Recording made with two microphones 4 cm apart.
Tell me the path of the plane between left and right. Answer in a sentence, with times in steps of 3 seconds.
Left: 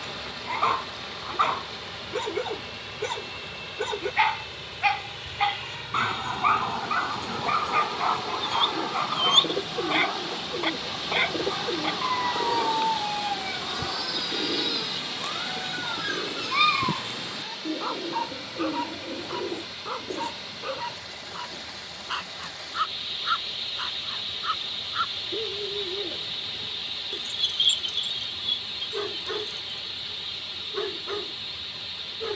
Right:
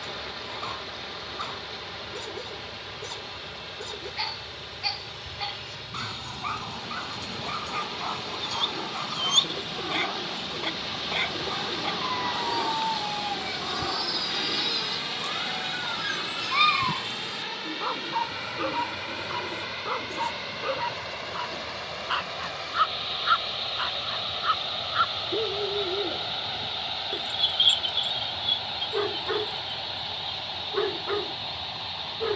In this clip you hear the plane on the left from 0 s, in the centre from 9 s and on the right from 15 s.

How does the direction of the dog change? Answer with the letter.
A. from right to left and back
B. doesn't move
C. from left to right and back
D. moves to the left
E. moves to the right
E.